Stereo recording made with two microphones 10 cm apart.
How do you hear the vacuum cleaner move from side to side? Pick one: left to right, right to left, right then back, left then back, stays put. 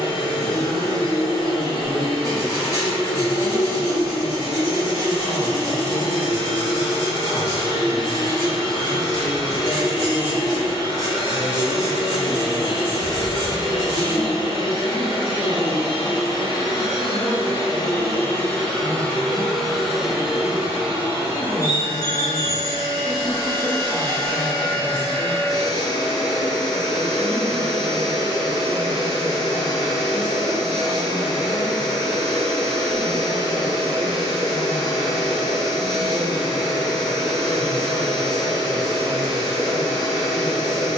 left to right.